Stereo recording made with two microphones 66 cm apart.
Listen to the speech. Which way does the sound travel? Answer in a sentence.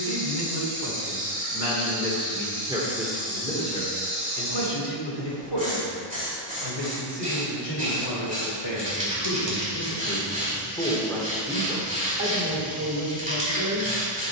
In this clip you hear the speech go left and come back.